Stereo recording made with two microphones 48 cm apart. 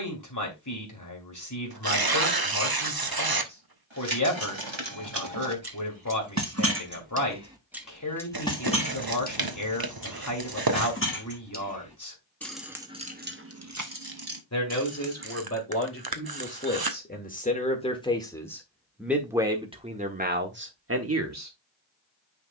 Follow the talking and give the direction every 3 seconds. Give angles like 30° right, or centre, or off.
40° left, 40° left, 40° left, 40° left, 30° left, 20° left, 10° right, 30° right.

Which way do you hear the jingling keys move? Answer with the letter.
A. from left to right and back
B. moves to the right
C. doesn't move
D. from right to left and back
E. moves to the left
D.